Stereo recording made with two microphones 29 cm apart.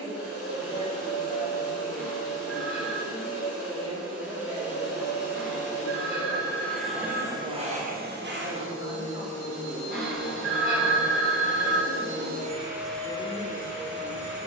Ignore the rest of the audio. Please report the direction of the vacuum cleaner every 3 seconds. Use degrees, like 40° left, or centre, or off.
50° left, 40° left, 20° right, 60° right, 10° left.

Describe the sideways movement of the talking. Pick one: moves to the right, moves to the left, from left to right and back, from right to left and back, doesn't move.
doesn't move.